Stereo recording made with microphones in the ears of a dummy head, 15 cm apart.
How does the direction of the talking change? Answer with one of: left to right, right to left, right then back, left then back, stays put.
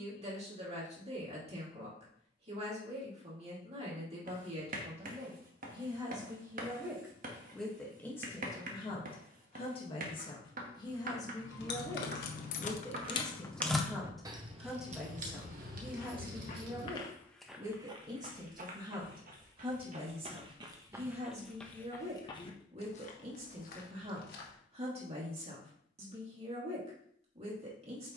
left then back.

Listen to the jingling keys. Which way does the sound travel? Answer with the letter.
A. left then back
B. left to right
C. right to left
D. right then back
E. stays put
B.